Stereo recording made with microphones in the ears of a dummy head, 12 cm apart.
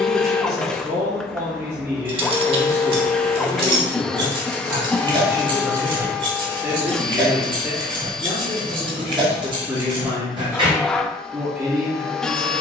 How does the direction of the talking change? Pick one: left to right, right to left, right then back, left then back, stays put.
stays put.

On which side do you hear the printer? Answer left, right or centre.
centre.